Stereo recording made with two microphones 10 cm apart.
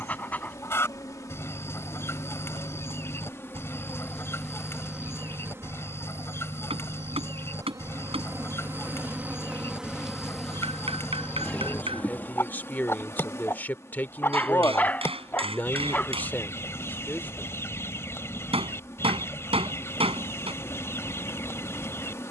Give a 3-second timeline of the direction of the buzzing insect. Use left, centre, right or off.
left, centre, right, centre, left, left, left, left.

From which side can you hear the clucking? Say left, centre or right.
left.